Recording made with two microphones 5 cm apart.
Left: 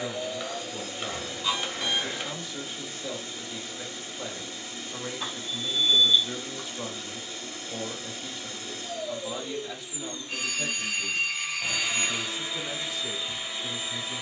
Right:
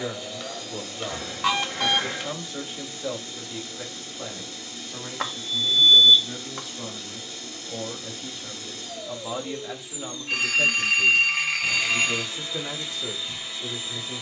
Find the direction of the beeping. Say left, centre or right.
right.